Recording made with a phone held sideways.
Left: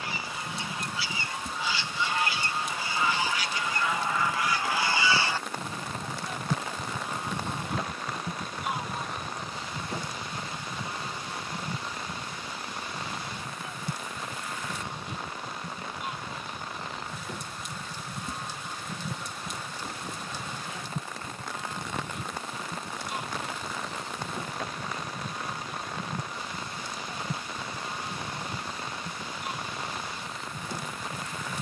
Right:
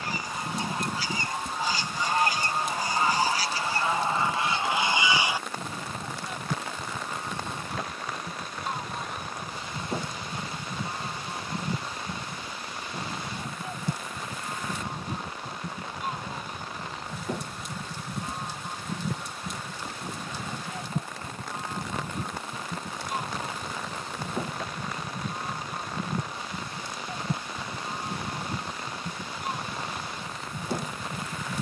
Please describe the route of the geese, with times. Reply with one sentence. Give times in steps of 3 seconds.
In this clip you hear the geese on the right from 0 s, in the centre from 6 s and on the right from 9 s.